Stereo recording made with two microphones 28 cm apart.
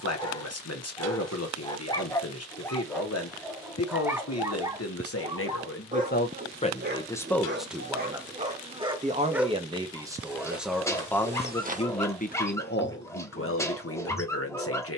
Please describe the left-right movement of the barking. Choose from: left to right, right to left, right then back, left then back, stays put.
right then back.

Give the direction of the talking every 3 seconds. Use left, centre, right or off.
left, left, centre, centre, left.